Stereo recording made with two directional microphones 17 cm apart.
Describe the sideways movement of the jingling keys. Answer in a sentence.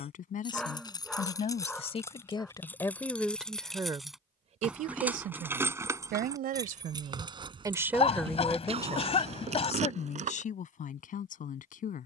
In this clip you hear the jingling keys travel towards the right.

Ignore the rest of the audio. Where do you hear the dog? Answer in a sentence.
In this clip you hear the dog in the centre.